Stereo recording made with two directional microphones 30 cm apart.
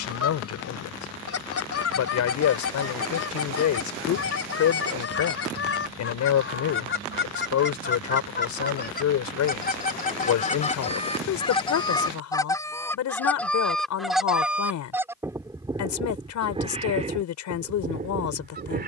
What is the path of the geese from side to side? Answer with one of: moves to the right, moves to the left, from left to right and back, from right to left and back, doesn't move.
moves to the right.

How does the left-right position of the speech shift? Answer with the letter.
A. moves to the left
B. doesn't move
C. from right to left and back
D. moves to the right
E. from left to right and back
B.